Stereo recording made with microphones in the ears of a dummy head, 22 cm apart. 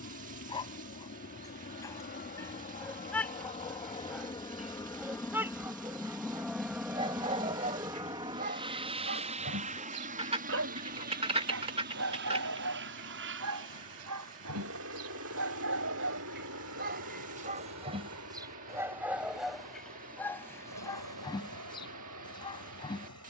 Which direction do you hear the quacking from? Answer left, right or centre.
right.